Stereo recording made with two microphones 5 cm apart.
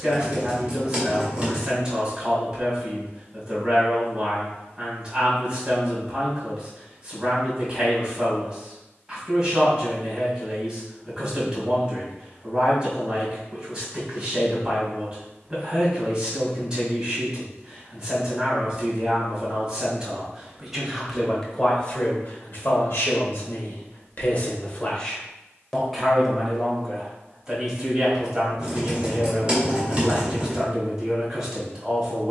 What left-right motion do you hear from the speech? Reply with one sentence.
In this clip you hear the speech move from right to left and back again.